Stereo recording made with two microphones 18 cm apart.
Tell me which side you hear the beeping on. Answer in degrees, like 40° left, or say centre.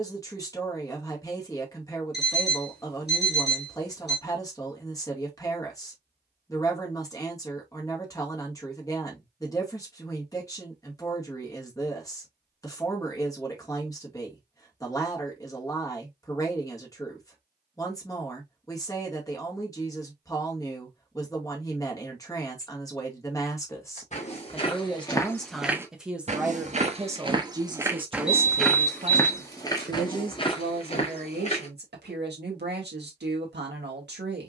70° left.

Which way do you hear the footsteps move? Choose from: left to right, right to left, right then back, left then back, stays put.
right then back.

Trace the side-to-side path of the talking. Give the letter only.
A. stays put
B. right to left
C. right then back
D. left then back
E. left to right
E.